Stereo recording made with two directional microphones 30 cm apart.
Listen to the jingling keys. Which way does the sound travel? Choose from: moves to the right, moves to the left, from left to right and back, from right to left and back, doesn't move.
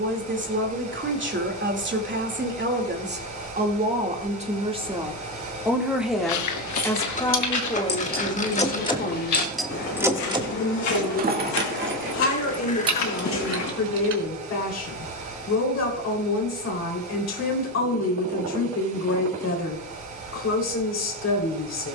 moves to the right.